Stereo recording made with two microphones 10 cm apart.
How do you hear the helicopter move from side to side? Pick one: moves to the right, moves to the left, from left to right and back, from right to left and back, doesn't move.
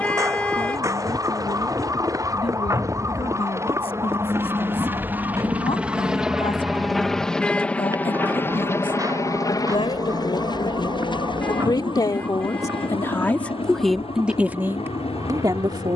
moves to the left.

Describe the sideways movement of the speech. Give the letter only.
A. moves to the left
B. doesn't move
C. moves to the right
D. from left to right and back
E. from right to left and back
C.